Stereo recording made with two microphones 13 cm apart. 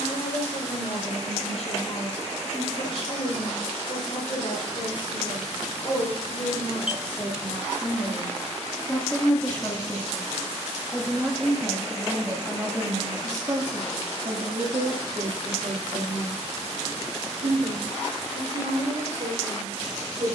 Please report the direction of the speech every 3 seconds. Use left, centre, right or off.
left, left, left, centre, right, right, right.